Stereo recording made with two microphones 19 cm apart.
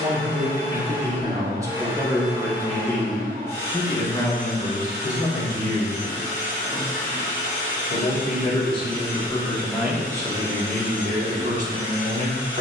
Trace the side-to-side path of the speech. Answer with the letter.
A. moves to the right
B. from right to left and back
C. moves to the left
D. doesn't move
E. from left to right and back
B.